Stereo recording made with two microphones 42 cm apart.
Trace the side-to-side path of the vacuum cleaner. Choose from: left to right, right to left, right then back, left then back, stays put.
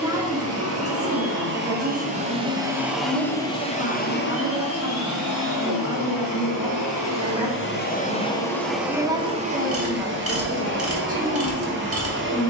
left then back.